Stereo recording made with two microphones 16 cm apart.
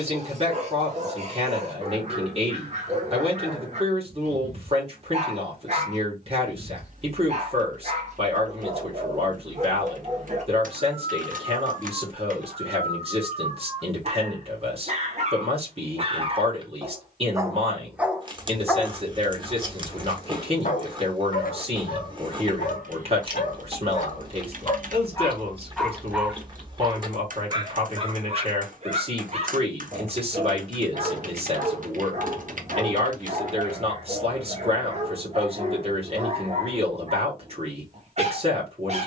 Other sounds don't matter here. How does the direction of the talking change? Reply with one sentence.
In this clip you hear the talking stay put.